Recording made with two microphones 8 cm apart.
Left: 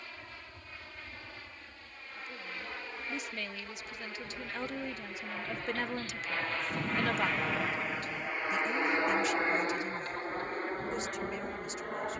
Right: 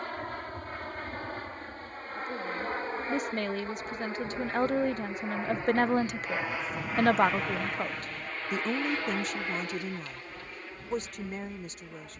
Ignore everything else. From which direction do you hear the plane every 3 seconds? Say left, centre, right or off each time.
right, right, centre, left.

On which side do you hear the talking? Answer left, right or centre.
right.